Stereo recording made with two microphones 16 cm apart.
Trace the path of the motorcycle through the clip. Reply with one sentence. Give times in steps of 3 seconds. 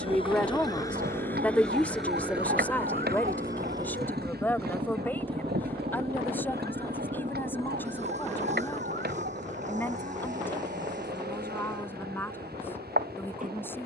In this clip you hear the motorcycle in the centre from 0 s and on the right from 3 s.